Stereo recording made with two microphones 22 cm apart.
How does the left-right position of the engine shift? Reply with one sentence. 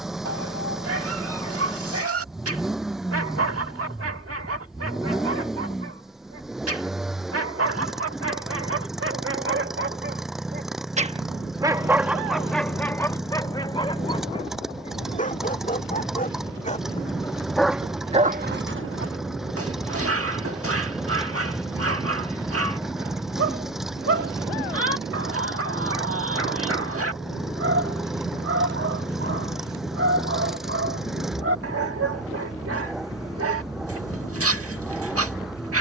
In this clip you hear the engine stay in one place.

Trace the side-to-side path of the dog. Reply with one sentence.
You can hear the dog move from right to left and back again.